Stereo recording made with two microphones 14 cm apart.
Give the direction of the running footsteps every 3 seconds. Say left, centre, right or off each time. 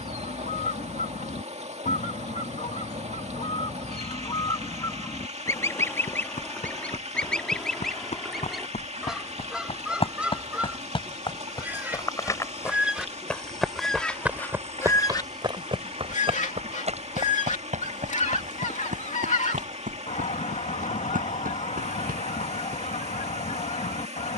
off, left, left, left, centre, right, right, right.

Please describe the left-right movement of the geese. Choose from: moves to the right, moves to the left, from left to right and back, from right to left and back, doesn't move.
from left to right and back.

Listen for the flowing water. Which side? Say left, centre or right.
right.